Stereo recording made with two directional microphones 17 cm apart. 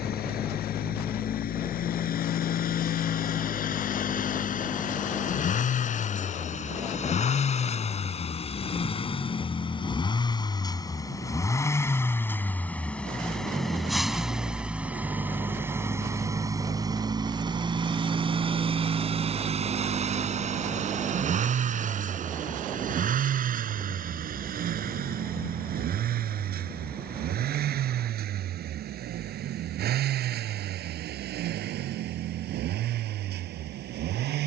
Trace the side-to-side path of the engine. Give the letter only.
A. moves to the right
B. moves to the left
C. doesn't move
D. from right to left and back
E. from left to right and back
A.